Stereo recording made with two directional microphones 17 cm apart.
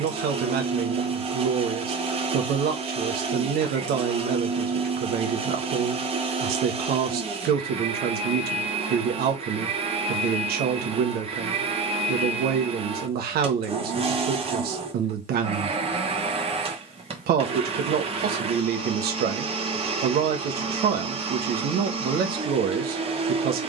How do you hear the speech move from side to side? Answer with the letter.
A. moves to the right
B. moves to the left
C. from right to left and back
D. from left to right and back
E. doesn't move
E.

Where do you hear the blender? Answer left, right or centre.
right.